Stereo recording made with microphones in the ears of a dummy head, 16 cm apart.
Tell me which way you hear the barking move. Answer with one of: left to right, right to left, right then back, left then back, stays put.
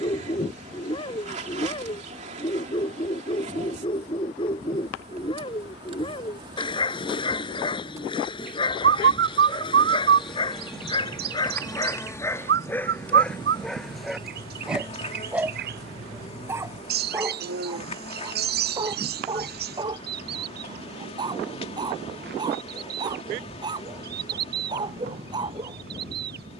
left to right.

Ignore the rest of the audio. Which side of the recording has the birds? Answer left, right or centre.
right.